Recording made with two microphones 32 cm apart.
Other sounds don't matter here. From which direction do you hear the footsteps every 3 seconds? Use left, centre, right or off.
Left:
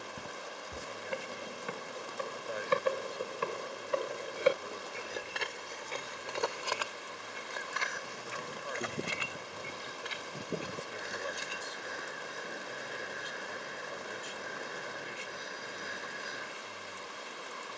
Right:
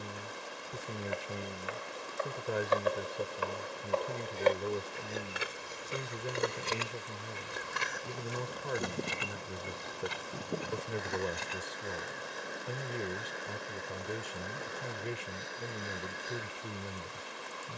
left, centre, right, right, off, off.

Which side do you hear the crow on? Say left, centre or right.
centre.